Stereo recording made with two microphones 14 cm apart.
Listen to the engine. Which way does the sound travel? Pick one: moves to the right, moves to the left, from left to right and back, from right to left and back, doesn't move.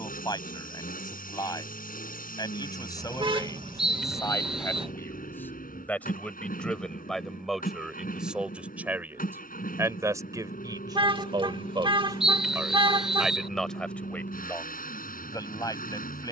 doesn't move.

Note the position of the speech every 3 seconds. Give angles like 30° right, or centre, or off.
30° left, 20° left, centre, 30° right, centre, 30° left.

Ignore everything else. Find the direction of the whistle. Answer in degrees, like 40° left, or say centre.
centre.